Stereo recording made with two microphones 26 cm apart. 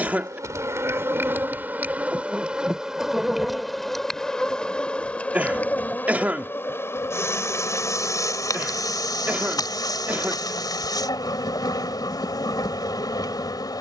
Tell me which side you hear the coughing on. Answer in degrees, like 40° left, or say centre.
10° right.